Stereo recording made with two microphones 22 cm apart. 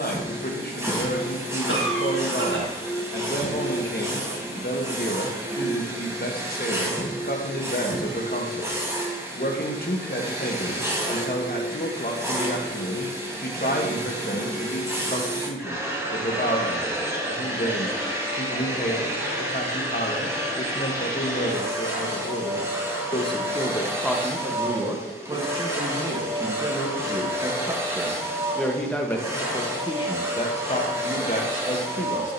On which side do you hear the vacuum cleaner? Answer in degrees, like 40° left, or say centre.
10° right.